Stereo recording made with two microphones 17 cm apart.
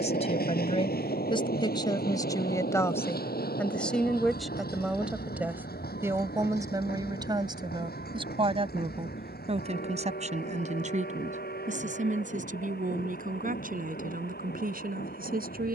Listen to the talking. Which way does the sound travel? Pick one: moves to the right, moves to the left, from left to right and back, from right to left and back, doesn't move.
moves to the right.